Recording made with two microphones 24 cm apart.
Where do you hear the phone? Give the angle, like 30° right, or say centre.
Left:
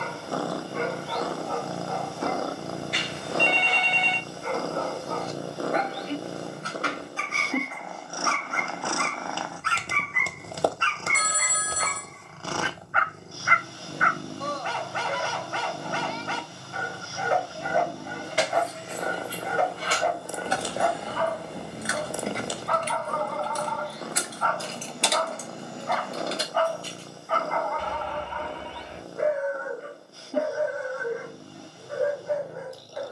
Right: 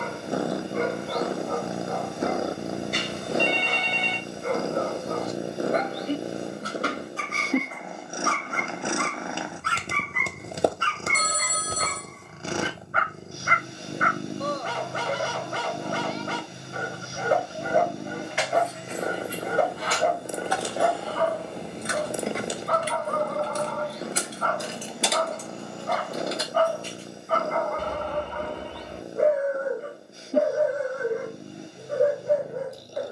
50° right.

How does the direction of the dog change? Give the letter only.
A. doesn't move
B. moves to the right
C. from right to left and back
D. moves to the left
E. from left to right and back
A.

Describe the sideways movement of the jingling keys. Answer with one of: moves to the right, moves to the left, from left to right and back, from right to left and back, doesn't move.
from left to right and back.